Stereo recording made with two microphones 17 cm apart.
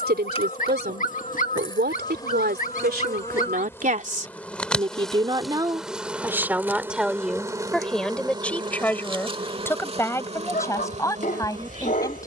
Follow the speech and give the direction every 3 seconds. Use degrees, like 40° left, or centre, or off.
80° right, 40° right, centre, 20° left.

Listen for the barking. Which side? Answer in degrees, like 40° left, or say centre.
50° left.